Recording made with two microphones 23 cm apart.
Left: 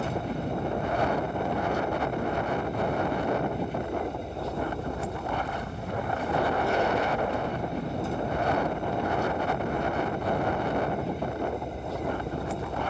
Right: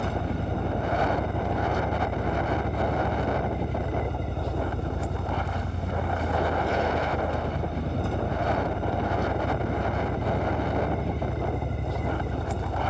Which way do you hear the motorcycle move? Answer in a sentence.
You can hear the motorcycle stay in one place.